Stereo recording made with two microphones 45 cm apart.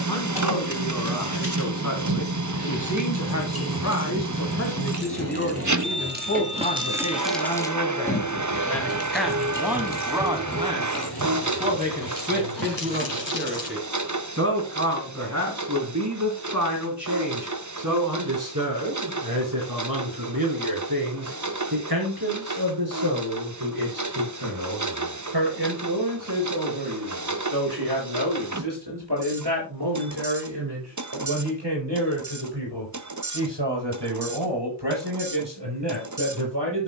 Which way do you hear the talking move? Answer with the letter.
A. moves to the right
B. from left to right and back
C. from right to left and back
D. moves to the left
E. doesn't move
A.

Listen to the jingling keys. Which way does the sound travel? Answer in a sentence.
You can hear the jingling keys travel towards the left.